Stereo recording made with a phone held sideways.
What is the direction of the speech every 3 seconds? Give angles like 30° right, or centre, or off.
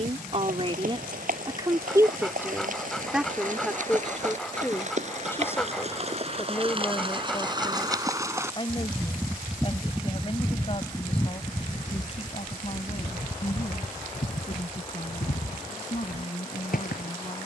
30° right, 10° left, 30° left, 40° left, 40° left, 40° left.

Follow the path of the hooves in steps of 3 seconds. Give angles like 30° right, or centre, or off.
60° right, 50° right, 30° right, 10° left, 50° left, 60° left.